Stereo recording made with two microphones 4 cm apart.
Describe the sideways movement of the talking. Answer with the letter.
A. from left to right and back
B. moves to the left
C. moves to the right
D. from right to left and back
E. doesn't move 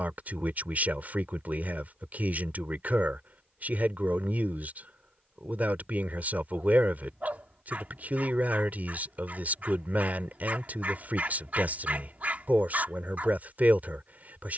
E.